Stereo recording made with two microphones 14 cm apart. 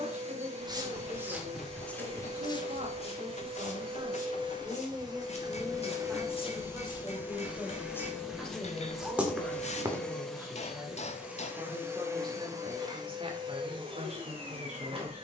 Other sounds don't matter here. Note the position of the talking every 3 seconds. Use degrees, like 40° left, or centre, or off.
60° right, 30° right, centre, 10° right, 50° right.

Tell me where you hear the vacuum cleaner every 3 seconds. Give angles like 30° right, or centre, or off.
50° right, 40° right, 10° right, centre, 30° right.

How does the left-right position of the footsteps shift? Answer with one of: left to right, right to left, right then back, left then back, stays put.
left then back.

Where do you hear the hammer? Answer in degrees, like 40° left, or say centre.
50° left.